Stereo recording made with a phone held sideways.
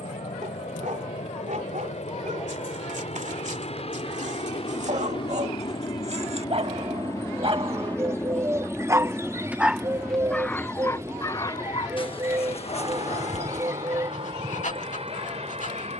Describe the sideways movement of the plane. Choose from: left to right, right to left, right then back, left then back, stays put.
left to right.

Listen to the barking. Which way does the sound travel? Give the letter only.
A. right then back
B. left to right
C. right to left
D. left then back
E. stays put
C.